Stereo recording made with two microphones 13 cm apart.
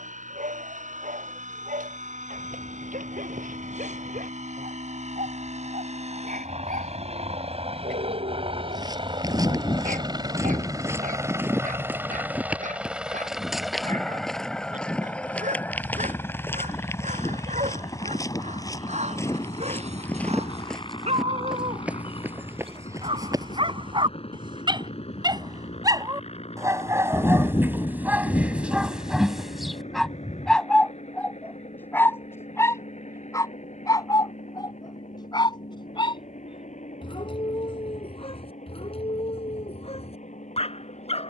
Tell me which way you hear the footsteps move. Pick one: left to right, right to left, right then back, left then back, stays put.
left then back.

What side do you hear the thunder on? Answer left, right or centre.
left.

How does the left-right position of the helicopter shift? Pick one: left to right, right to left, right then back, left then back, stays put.
right to left.